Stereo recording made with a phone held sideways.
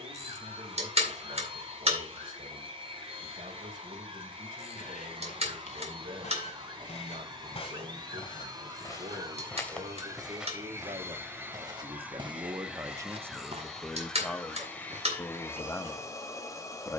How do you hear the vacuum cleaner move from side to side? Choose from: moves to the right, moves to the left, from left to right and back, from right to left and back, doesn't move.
moves to the left.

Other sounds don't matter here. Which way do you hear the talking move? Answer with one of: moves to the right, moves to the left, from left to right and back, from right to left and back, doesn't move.
moves to the left.